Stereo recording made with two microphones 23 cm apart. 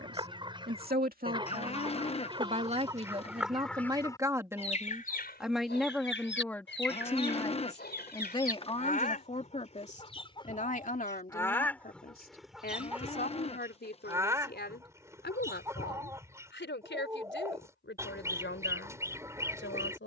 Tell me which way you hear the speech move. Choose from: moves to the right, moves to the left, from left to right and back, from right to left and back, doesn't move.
moves to the left.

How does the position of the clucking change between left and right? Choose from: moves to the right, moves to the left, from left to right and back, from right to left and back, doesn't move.
from right to left and back.